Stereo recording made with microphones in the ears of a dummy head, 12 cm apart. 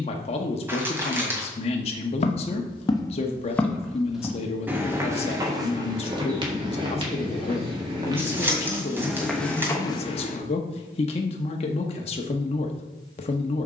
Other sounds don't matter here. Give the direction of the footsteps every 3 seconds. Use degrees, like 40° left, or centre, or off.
40° left, 10° right, 30° right, 20° left, off.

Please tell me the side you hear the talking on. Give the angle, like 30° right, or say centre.
40° left.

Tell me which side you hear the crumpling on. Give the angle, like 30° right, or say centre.
20° right.